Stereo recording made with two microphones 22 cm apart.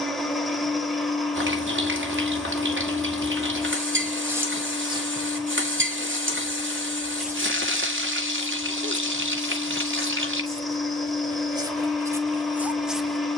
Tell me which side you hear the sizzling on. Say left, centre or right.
right.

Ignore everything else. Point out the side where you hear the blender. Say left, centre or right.
centre.